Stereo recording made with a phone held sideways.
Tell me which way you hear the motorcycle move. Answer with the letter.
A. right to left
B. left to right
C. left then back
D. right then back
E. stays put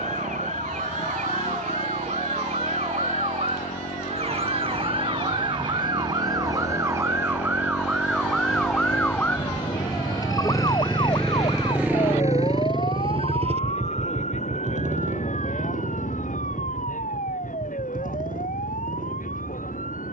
B.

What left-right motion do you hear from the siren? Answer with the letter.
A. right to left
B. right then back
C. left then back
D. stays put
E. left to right
A.